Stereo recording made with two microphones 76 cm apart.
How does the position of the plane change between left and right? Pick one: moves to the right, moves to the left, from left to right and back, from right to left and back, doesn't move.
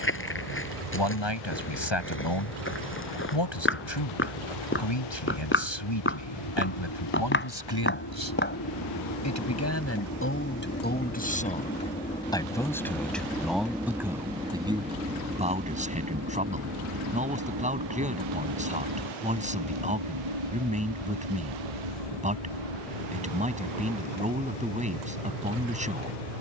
moves to the right.